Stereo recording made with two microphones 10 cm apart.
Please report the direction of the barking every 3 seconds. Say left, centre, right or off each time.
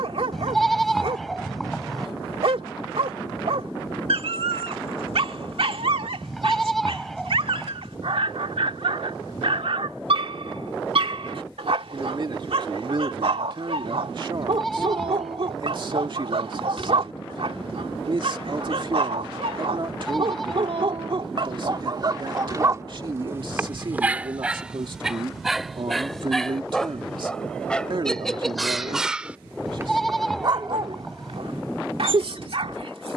right, right, right, right, right, right, right, right, centre, centre, right.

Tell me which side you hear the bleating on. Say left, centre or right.
centre.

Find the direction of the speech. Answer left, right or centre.
right.